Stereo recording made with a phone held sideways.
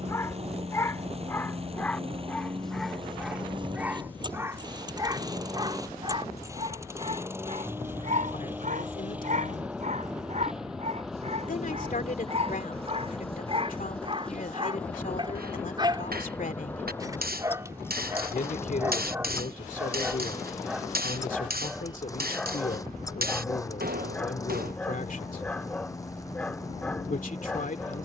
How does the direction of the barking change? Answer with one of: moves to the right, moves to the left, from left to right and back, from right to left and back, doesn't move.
from left to right and back.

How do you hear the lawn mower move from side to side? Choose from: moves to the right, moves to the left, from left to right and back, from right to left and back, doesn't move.
moves to the left.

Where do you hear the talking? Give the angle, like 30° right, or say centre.
60° left.